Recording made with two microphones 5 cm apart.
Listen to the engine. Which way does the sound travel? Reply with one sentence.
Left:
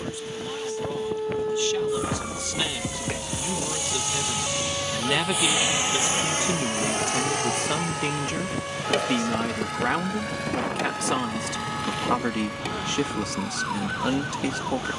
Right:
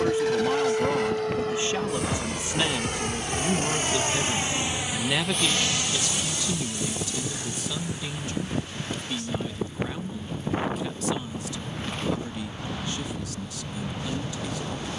In this clip you hear the engine go from the right side to the left.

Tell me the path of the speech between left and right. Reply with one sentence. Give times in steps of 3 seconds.
In this clip you hear the speech on the right from 0 s, in the centre from 3 s and on the left from 6 s.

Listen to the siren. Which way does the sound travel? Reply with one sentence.
In this clip you hear the siren move from right to left.